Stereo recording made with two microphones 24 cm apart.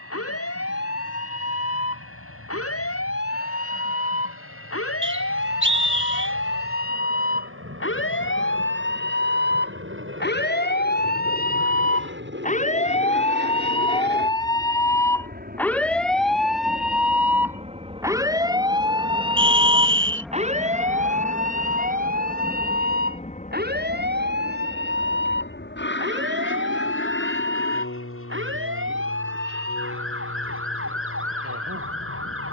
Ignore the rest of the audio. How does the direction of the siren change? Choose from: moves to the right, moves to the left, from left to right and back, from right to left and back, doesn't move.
moves to the right.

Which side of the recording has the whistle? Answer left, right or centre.
right.